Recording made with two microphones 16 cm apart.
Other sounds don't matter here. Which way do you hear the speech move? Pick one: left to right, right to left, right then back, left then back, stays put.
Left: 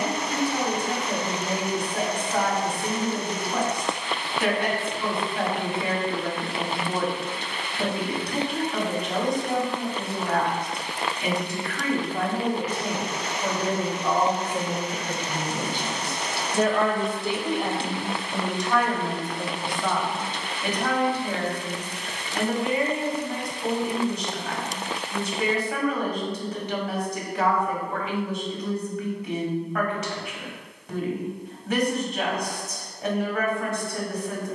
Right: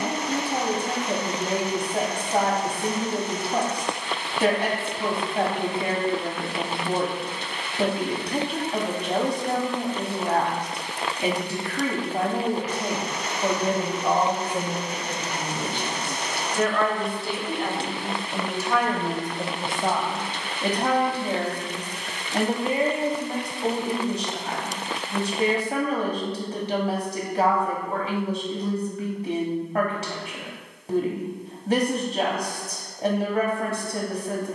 left then back.